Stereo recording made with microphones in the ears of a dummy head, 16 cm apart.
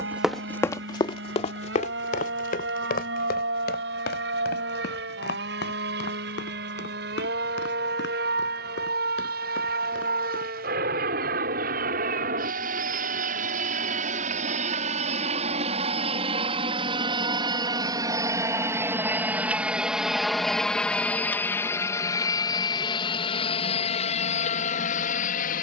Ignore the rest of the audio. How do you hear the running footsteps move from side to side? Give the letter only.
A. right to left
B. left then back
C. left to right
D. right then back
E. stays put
A.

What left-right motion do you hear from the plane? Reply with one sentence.
In this clip you hear the plane go from the right side to the left.